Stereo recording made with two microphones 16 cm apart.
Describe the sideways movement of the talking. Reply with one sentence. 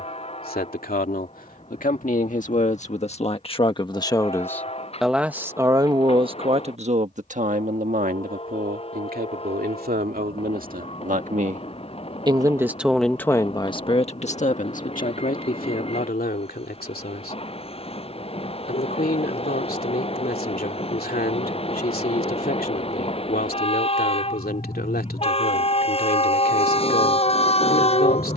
In this clip you hear the talking move from left to right and back again.